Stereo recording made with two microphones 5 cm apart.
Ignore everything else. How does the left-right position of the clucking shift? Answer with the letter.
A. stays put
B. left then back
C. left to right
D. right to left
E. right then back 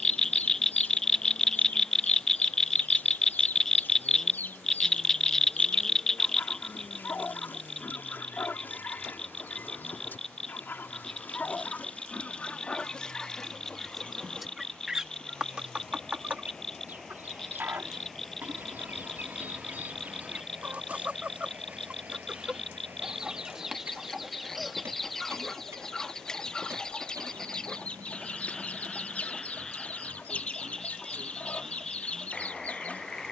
E.